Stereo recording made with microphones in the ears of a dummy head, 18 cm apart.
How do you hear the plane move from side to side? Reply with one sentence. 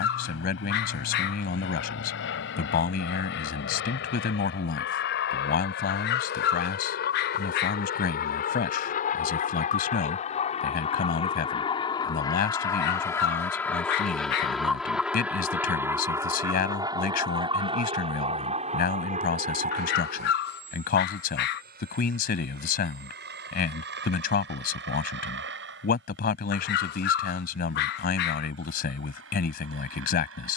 You can hear the plane move from left to right.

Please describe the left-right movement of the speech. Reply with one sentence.
You can hear the speech stay put.